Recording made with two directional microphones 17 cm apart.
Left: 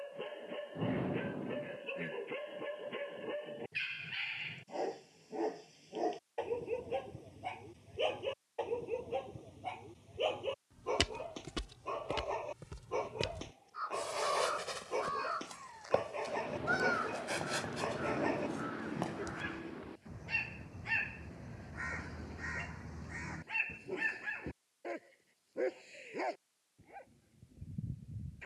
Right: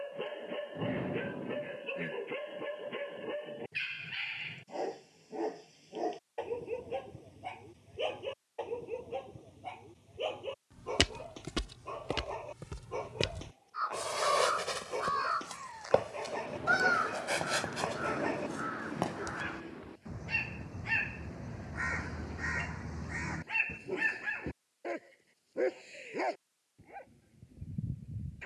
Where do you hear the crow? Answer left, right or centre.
right.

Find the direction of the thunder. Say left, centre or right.
centre.